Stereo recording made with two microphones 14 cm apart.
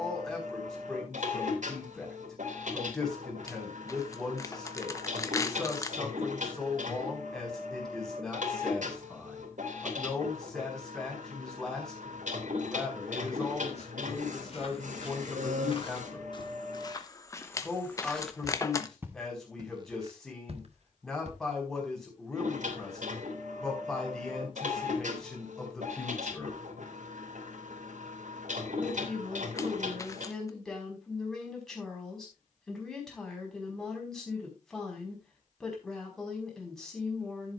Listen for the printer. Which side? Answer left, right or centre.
right.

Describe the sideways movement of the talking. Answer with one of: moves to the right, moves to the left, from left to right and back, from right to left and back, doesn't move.
doesn't move.